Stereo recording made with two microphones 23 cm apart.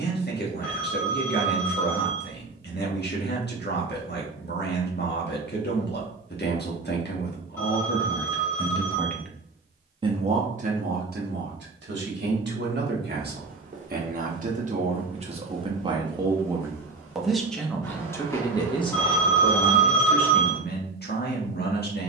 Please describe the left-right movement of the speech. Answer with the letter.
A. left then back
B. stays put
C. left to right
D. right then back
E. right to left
D.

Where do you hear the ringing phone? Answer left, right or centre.
centre.